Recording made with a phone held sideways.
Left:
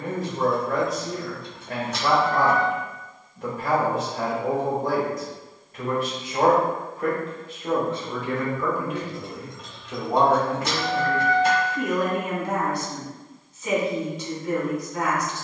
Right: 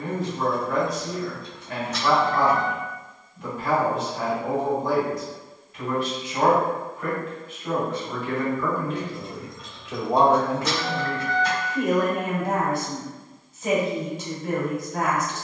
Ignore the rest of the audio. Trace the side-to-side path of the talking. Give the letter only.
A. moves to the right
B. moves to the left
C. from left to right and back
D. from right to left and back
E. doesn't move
A.